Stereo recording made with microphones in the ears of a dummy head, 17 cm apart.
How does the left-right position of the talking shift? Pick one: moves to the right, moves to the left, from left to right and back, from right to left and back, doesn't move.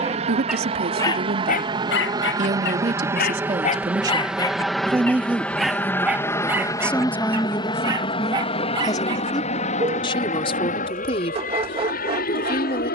moves to the left.